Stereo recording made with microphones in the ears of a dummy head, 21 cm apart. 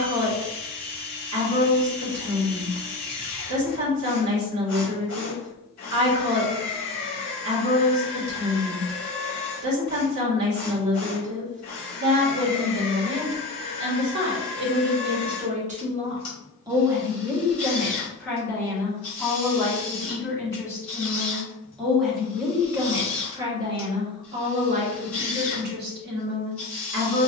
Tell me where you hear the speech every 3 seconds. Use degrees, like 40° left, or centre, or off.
60° right, 60° right, 60° right, 60° right, 60° right, 20° right, 10° left, 10° right, 40° right.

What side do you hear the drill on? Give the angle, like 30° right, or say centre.
40° left.